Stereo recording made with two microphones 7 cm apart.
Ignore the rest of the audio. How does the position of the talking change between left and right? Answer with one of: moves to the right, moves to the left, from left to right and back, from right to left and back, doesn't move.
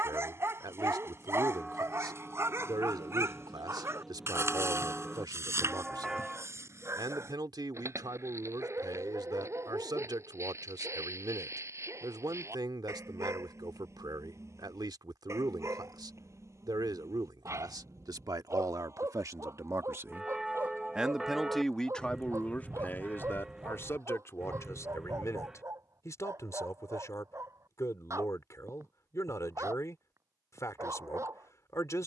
moves to the left.